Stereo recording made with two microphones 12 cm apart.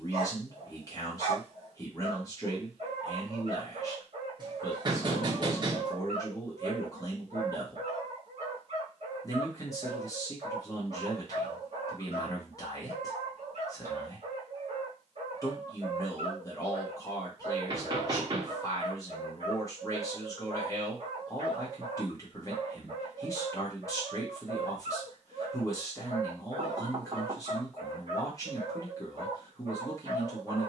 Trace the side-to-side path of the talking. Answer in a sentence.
You can hear the talking stay in one place.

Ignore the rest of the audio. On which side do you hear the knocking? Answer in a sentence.
You can hear the knocking on the right.